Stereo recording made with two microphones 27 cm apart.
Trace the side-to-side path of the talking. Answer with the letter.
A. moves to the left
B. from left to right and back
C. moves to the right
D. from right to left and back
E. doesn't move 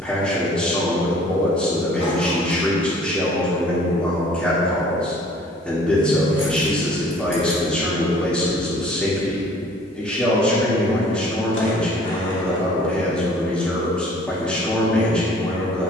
E.